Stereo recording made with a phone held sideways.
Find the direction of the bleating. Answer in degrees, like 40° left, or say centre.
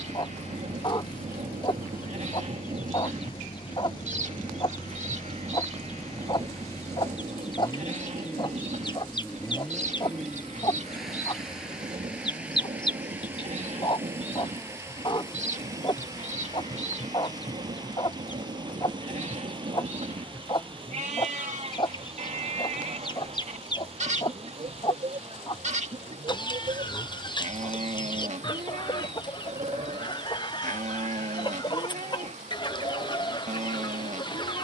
50° right.